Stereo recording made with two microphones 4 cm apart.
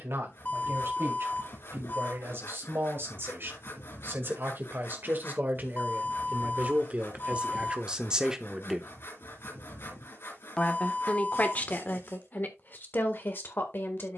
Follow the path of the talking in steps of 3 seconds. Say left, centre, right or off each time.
right, right, right, left, left.